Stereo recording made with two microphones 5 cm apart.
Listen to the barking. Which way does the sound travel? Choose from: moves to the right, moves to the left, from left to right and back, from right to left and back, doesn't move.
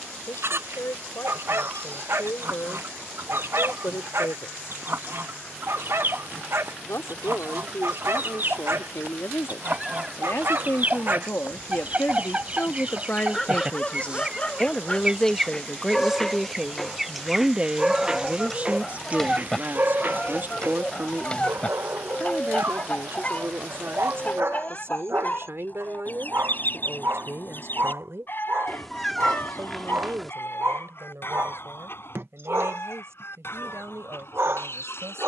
from right to left and back.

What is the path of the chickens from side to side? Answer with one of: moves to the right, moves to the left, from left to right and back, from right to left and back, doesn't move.
moves to the left.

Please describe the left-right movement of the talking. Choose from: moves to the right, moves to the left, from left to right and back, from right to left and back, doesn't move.
moves to the right.